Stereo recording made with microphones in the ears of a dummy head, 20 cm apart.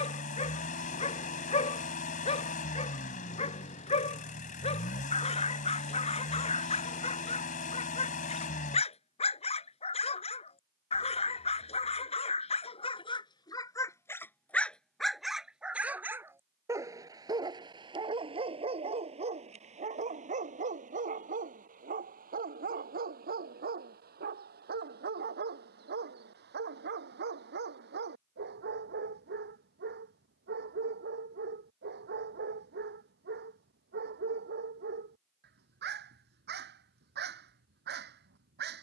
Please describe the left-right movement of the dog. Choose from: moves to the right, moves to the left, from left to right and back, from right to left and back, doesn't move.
moves to the right.